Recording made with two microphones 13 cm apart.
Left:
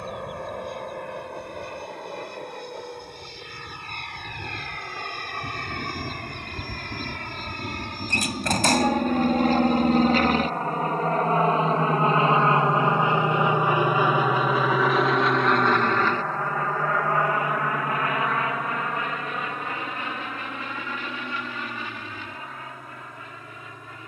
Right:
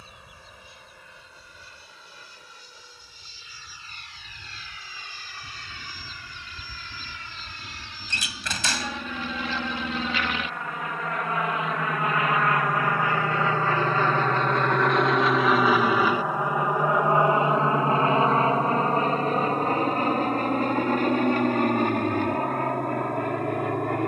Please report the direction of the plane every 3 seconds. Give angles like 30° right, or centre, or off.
70° left, 70° left, 60° left, 40° left, 20° left, 10° right, 30° right, 50° right.